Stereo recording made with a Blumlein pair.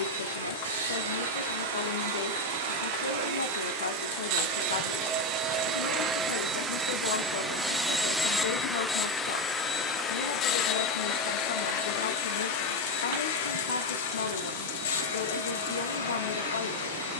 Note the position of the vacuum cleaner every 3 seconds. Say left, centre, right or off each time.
right, right, centre, left, left, left.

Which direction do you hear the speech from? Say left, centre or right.
left.